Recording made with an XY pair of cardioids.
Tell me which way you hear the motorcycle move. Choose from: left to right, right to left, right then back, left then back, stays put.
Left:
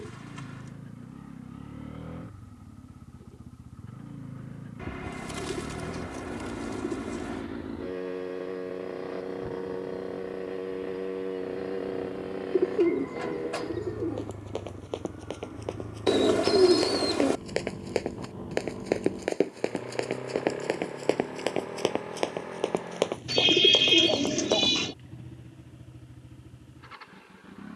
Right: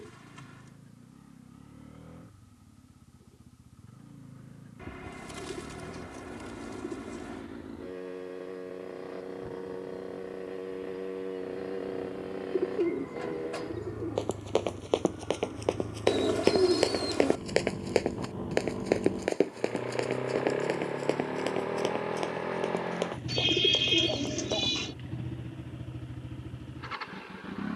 left to right.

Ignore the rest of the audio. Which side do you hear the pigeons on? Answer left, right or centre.
left.